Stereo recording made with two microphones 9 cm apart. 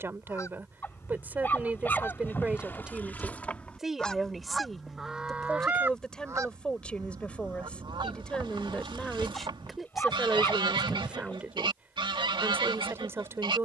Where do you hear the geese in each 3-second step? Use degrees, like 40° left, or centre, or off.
30° left, centre, 50° right, 60° right, 60° right.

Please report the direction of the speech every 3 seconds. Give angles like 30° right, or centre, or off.
20° right, centre, 10° left, 10° right, 30° right.